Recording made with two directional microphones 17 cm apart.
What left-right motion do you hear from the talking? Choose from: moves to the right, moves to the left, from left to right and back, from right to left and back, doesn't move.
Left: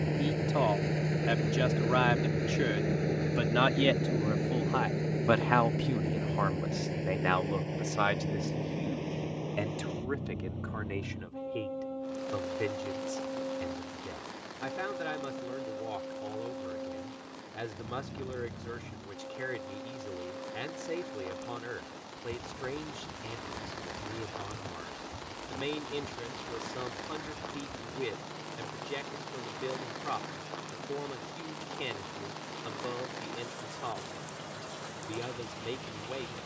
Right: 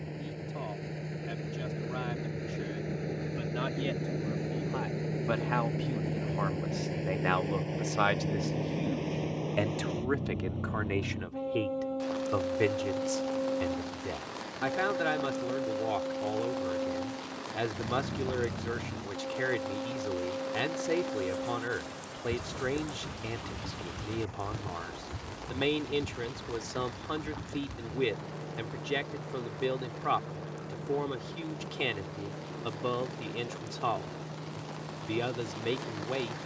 moves to the right.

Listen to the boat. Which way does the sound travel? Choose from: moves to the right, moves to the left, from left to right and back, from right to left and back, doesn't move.
moves to the right.